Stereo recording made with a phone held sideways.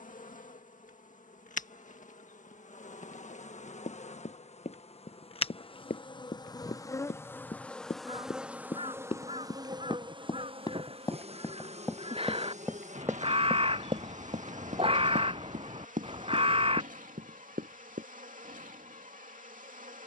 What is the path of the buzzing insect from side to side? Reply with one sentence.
In this clip you hear the buzzing insect travel towards the right.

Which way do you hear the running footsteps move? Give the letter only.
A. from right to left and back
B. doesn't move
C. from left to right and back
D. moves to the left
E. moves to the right
E.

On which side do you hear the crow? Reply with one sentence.
In this clip you hear the crow on the right.